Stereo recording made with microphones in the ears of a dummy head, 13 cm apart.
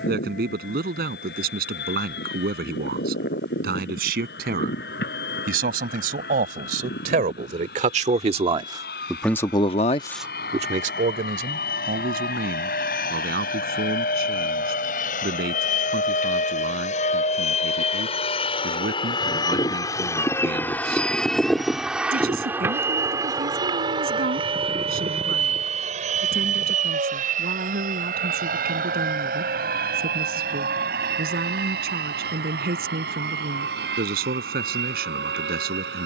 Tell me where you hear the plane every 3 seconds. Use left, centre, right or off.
left, left, left, left, left, left, left, centre, right, right, right, right.